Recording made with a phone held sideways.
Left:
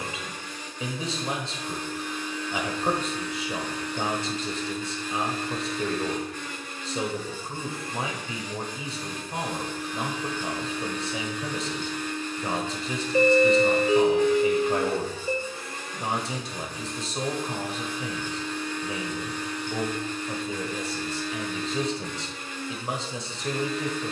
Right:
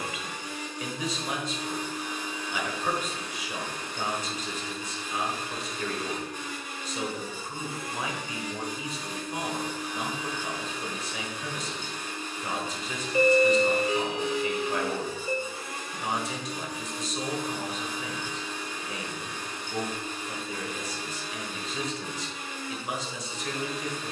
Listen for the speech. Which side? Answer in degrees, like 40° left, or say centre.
30° left.